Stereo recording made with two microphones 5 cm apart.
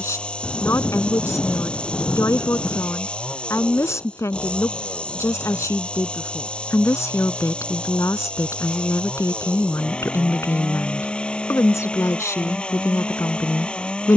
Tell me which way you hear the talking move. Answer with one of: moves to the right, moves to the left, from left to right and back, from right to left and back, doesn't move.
doesn't move.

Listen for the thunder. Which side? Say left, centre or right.
left.